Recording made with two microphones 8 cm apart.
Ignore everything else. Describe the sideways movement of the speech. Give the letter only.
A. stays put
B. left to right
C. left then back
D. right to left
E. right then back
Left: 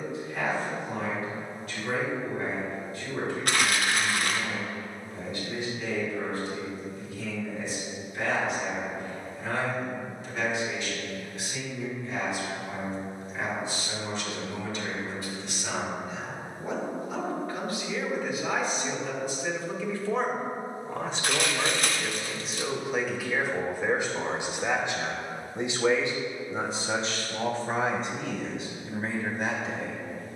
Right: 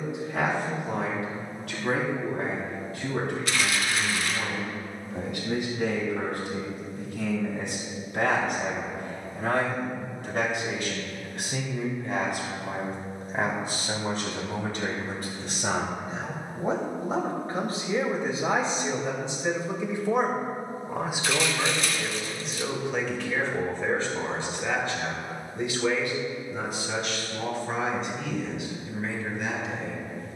D.